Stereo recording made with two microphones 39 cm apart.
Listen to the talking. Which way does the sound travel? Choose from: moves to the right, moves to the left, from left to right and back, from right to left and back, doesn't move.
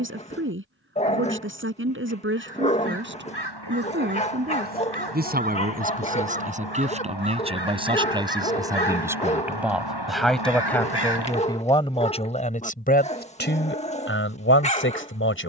moves to the left.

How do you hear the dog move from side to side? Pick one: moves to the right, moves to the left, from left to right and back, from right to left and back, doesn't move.
doesn't move.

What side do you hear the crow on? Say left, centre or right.
left.